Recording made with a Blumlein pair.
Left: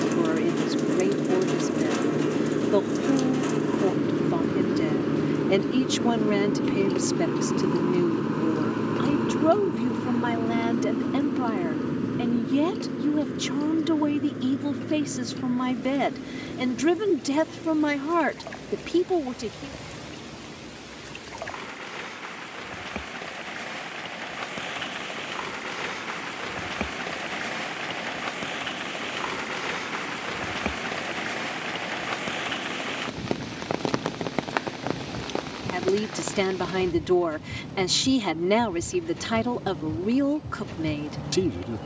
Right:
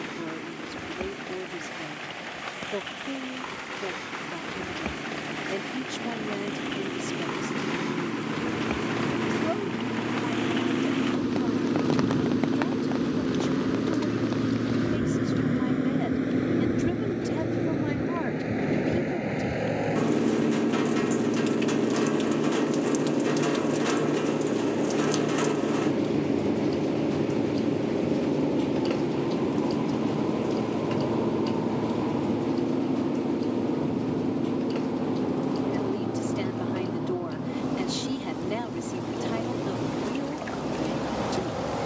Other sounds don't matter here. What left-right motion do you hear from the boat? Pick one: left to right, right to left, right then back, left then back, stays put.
left to right.